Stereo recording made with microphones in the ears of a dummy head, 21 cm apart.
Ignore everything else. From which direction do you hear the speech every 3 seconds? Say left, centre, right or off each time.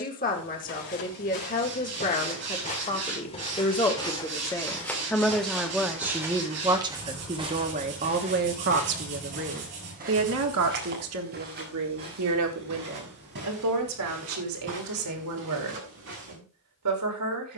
left, centre, right, right, right, right.